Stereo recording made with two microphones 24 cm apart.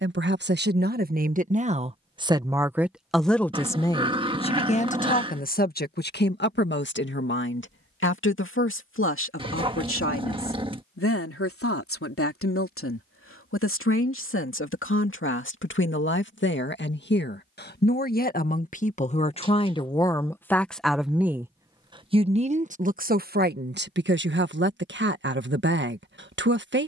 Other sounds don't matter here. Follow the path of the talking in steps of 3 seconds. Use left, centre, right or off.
right, left, left, left, left, left, left, right, right.